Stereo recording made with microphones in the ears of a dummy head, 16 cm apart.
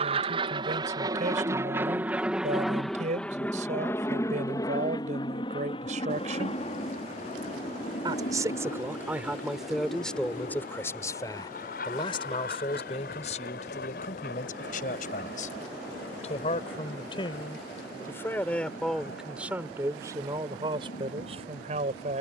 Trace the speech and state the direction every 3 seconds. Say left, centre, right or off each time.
right, right, right, centre, left, left, centre, right.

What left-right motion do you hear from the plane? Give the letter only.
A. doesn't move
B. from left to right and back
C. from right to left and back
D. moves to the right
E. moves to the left
E.